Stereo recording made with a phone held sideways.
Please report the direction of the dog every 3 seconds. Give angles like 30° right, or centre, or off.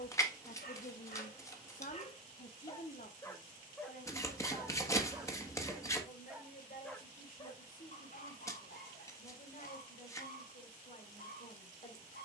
50° left, centre, 40° left, 70° left.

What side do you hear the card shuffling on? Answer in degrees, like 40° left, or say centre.
20° left.